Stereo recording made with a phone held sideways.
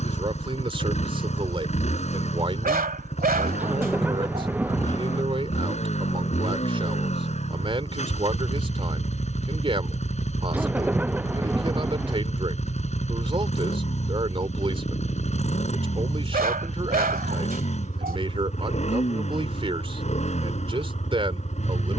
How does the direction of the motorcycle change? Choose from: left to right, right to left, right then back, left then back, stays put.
stays put.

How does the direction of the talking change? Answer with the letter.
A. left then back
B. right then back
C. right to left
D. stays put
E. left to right
D.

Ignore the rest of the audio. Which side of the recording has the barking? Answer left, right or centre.
right.